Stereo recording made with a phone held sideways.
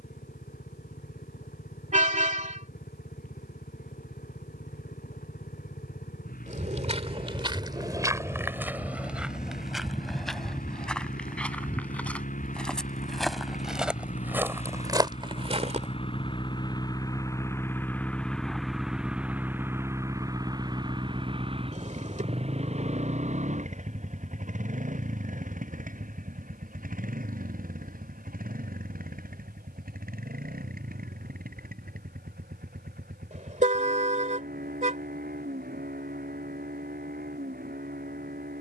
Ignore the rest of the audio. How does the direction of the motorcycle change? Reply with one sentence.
In this clip you hear the motorcycle go from the left side to the right.